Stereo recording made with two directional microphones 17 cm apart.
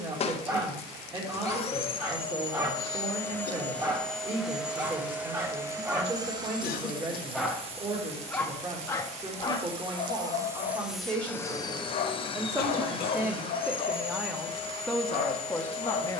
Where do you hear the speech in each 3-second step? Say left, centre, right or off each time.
right, right, right, right, centre, centre.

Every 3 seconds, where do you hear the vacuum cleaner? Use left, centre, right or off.
left, centre, right, centre, left, left.